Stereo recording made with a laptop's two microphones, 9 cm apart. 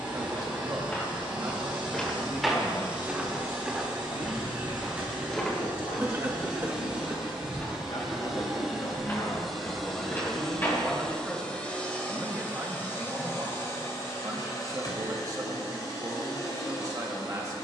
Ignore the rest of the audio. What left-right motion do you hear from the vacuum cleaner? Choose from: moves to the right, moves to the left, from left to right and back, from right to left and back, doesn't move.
moves to the left.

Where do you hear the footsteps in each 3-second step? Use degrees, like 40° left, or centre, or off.
10° left, centre, 20° left, 20° left, off, off.